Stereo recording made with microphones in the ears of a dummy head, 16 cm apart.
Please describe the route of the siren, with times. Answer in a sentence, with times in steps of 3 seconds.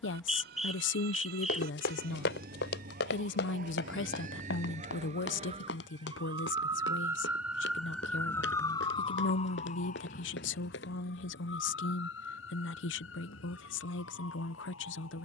You can hear the siren on the right from 0 s, in the centre from 6 s and on the left from 9 s.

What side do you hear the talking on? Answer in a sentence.
In this clip you hear the talking on the left.